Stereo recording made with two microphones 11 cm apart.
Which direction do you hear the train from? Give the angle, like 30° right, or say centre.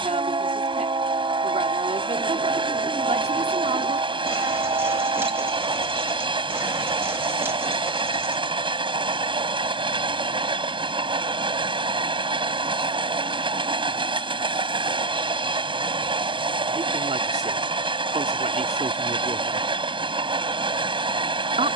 50° right.